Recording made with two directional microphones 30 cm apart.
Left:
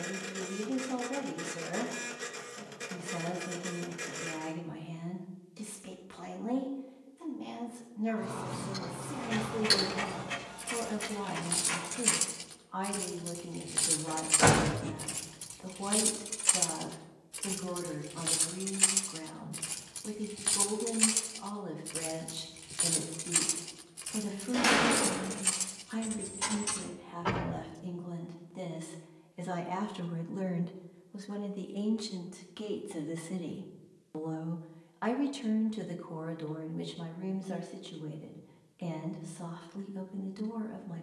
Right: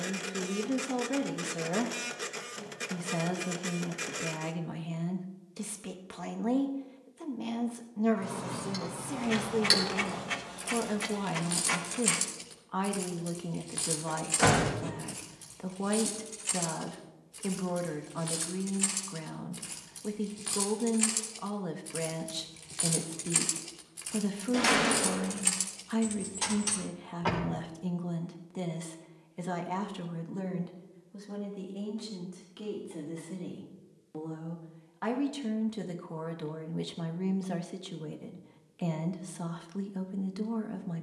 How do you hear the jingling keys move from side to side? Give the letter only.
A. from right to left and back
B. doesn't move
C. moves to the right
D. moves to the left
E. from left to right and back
A.